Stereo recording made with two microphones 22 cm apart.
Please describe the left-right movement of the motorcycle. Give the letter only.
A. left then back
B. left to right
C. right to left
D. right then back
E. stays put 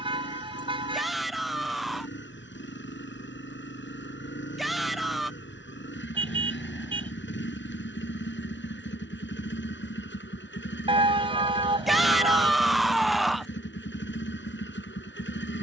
E.